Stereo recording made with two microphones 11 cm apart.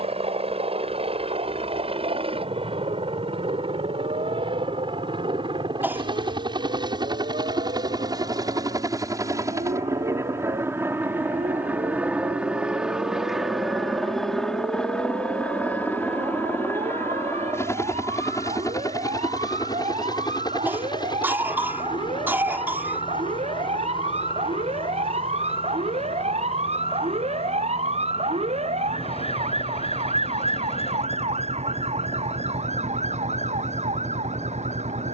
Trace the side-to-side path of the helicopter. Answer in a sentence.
You can hear the helicopter move from right to left.